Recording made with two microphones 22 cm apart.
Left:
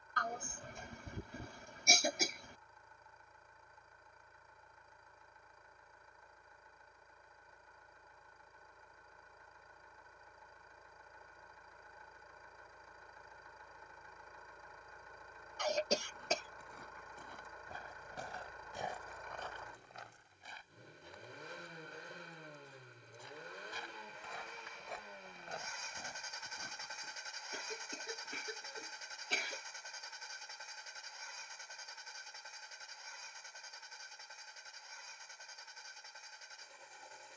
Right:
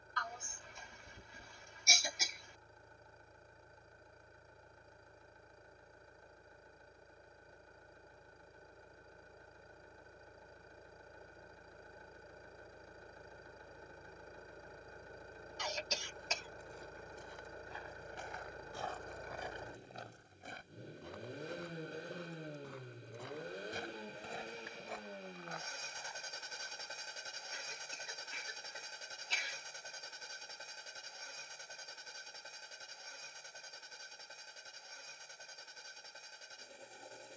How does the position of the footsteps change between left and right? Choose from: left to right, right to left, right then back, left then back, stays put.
right then back.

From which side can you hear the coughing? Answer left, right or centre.
left.